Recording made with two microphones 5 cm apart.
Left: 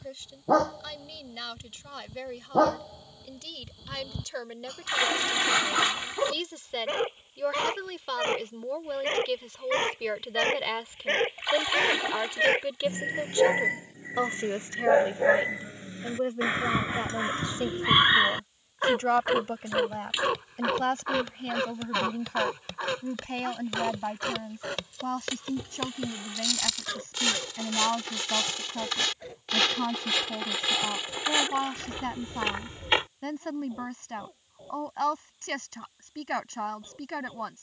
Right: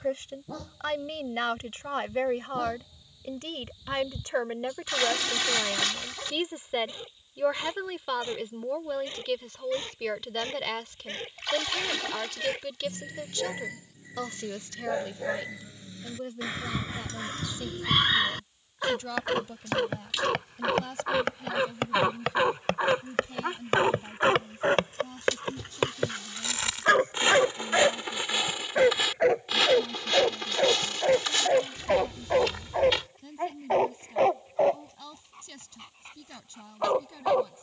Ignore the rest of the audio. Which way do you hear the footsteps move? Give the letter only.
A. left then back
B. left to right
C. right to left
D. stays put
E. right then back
C.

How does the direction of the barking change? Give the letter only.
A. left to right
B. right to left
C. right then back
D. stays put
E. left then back
A.